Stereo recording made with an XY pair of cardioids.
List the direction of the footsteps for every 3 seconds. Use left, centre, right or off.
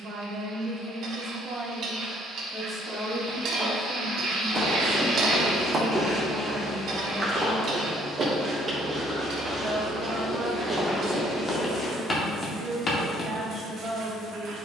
off, left, centre, centre, left.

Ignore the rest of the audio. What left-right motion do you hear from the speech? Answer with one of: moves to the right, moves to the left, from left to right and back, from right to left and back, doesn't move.
from right to left and back.